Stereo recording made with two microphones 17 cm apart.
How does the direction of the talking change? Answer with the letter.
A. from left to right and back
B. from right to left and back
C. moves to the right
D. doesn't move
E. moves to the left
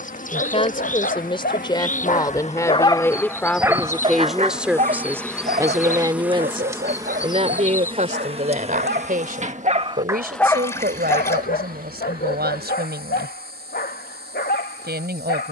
C.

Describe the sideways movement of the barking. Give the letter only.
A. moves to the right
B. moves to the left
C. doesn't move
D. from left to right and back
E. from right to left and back
D.